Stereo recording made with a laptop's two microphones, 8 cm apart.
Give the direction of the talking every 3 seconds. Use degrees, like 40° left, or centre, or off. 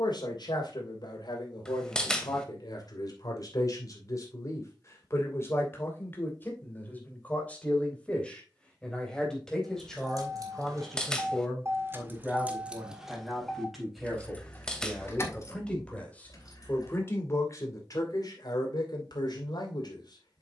60° left, 40° left, 20° left, centre, centre, 30° left, 60° left.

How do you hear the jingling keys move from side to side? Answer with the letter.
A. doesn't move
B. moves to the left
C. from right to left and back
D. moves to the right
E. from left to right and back
B.